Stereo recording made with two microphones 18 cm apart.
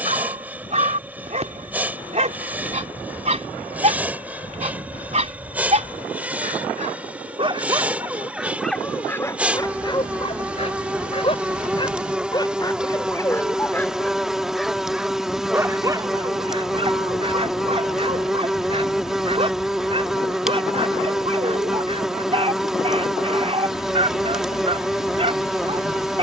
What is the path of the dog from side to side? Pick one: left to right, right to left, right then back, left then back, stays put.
left then back.